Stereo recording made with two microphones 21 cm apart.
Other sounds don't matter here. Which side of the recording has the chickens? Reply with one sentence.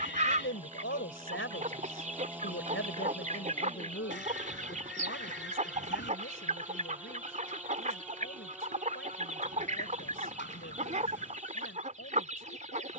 You can hear the chickens on the right.